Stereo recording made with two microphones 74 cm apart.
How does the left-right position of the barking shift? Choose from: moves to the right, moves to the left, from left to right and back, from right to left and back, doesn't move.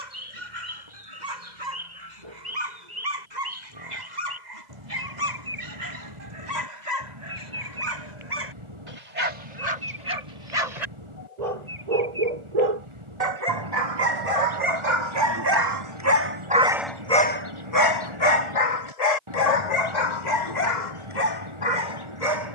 moves to the left.